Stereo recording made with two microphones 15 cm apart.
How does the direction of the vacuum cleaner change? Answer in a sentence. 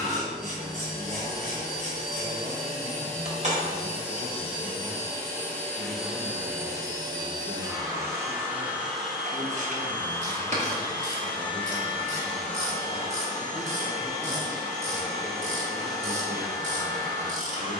In this clip you hear the vacuum cleaner go right and come back.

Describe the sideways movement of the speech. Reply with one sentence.
In this clip you hear the speech travel towards the left.